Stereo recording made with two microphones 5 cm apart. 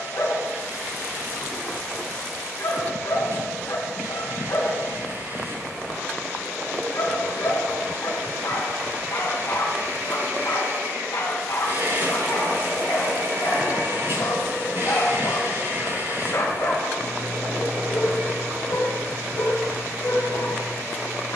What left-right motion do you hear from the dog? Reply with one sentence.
In this clip you hear the dog stay in one place.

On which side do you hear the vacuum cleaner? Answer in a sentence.
You can hear the vacuum cleaner on the right.